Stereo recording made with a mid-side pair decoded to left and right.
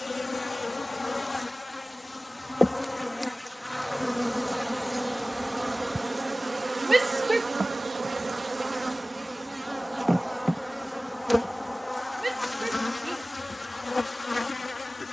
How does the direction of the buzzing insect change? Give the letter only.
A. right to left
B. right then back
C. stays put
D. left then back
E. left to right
B.